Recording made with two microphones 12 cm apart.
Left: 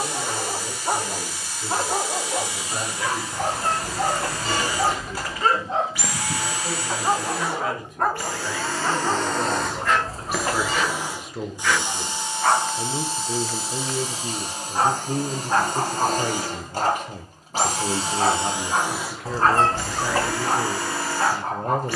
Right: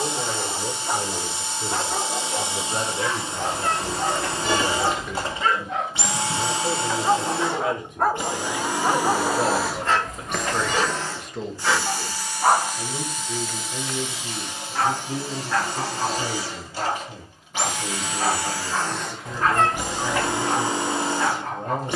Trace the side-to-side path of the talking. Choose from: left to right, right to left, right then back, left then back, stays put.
right to left.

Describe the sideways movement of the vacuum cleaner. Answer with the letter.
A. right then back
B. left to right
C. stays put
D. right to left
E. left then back
E.